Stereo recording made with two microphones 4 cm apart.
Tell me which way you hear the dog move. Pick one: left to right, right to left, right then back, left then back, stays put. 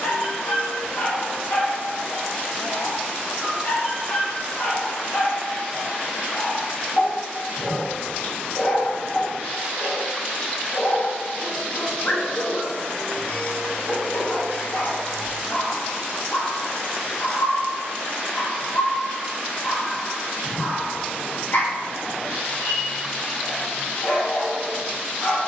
stays put.